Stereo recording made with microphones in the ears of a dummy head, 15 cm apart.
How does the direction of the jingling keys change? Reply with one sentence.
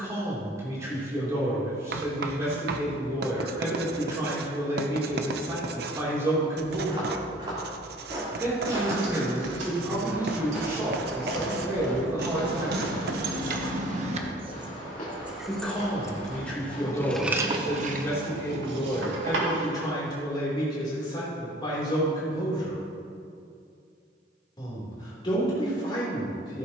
You can hear the jingling keys go left and come back.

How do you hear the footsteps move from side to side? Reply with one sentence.
In this clip you hear the footsteps move from right to left.